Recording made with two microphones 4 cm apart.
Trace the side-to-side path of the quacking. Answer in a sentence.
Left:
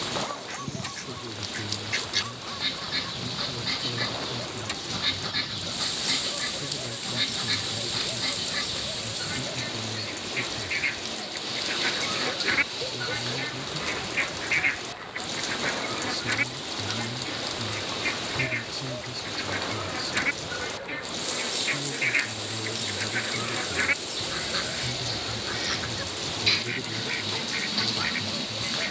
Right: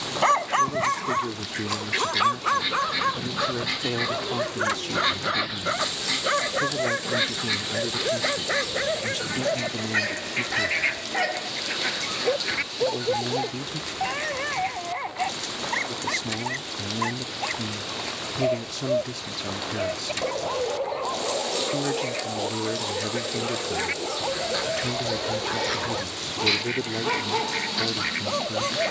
In this clip you hear the quacking go left and come back.